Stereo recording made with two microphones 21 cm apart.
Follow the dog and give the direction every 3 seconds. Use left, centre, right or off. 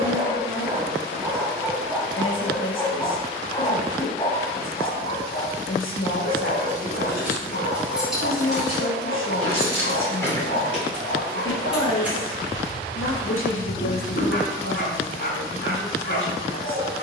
centre, left, left, left, left, left.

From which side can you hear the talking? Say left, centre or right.
left.